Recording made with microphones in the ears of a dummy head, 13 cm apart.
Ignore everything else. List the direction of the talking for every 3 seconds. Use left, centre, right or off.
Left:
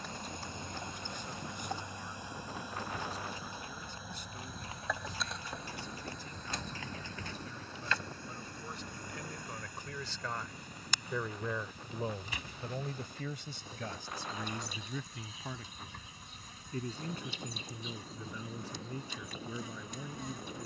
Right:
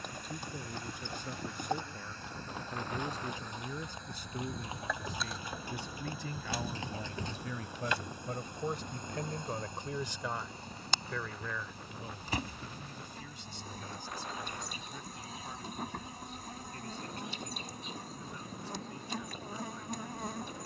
right, right, right, centre, left, left, left.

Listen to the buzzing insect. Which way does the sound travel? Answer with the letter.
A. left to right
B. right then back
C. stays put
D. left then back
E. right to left
A.